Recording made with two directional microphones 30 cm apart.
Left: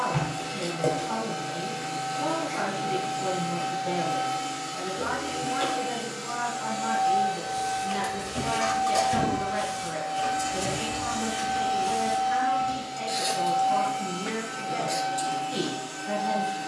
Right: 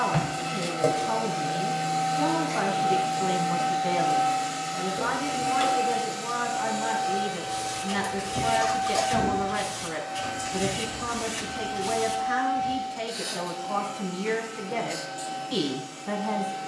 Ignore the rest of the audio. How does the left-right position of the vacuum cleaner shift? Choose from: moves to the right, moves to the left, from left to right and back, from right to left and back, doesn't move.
moves to the left.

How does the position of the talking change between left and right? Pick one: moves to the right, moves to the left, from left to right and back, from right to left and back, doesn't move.
doesn't move.